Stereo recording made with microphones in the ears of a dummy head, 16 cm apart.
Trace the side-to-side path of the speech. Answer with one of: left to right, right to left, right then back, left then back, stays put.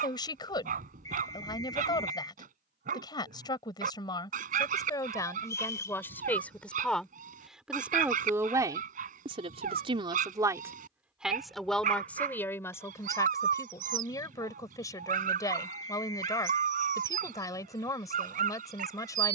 right then back.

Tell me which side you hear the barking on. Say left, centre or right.
right.